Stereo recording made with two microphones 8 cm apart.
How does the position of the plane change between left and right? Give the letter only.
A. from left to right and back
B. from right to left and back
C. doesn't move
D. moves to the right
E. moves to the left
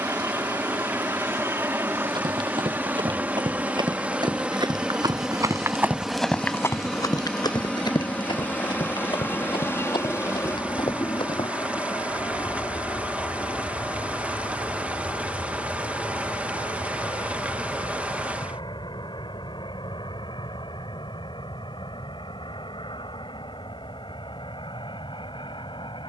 E.